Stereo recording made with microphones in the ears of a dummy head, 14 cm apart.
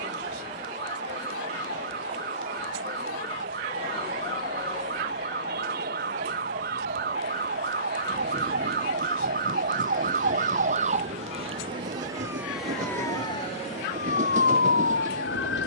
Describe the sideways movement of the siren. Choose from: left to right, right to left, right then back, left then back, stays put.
right to left.